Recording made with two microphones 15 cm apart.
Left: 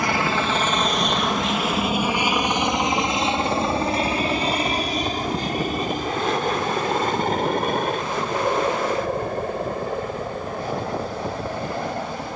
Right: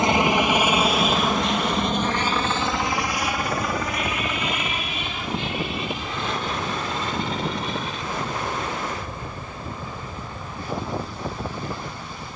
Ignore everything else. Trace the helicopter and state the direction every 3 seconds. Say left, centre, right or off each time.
centre, left, left, left.